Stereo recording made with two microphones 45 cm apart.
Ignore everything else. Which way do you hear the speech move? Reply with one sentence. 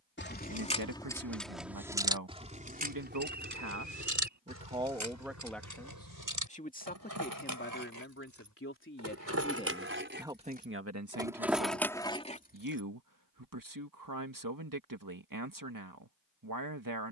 You can hear the speech go left and come back.